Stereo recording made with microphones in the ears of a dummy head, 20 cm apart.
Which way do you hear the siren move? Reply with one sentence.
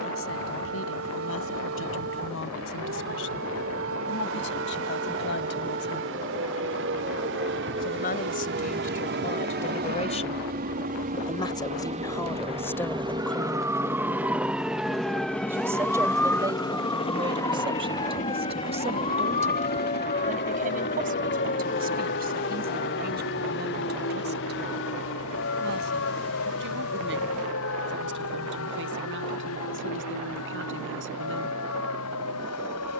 In this clip you hear the siren move from right to left.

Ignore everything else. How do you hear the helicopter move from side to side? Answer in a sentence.
You can hear the helicopter move to the left.